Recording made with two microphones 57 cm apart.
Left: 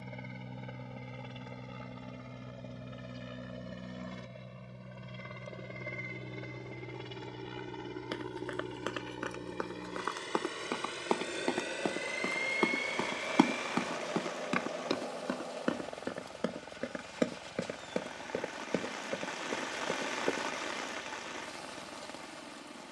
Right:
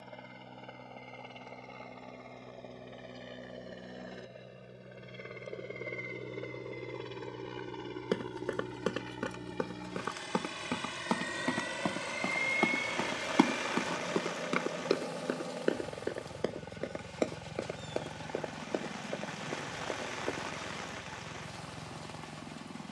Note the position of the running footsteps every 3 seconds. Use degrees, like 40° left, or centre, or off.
off, off, 60° right, 40° right, centre, 30° left, 50° left, off.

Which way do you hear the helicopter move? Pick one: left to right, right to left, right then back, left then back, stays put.
left to right.